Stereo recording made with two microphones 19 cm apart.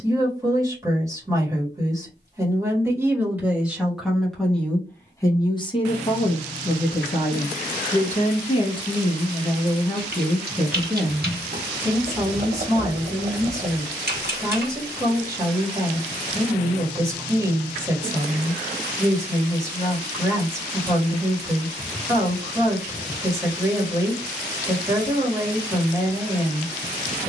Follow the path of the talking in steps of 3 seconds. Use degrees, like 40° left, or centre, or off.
20° right, 10° left, 40° left, centre, 20° right, 20° right, 20° right, 20° right, 20° right.